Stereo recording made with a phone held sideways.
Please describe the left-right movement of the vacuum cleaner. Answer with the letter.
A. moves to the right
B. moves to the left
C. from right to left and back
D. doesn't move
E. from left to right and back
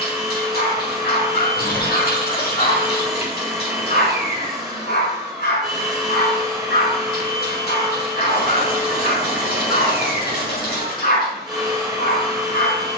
D.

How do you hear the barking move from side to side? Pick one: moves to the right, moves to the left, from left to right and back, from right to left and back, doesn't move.
doesn't move.